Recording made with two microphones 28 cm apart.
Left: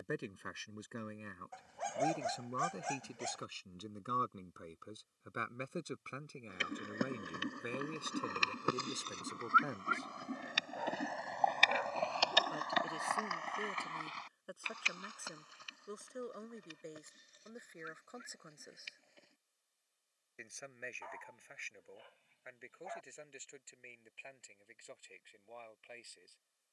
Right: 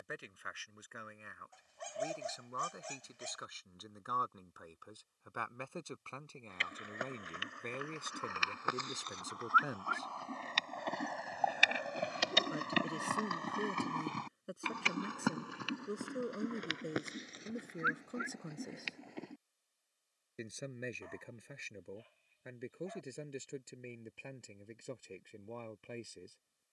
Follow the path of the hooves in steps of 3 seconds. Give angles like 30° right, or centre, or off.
off, off, 40° left, 10° left, 40° right, 70° right, 80° right, off, off.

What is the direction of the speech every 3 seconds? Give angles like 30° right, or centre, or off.
40° left, 30° left, 10° left, centre, 20° right, 30° right, 40° right, 50° right, 50° right.